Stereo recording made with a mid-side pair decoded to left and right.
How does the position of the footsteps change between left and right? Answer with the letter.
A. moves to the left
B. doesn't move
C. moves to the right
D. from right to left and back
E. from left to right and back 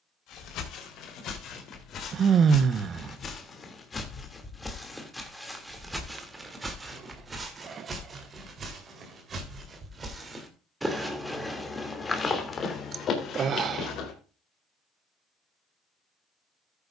E.